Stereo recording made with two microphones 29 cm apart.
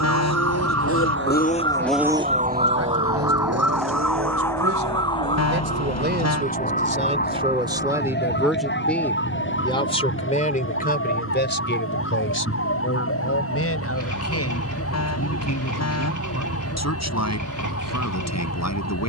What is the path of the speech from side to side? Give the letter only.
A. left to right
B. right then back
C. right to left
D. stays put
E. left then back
C.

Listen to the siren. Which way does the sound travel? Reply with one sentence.
In this clip you hear the siren move from right to left.